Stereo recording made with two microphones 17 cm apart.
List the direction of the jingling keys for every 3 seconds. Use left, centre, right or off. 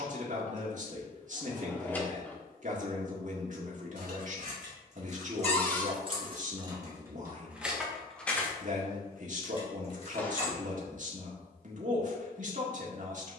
off, right, centre, left, off.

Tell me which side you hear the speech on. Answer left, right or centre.
right.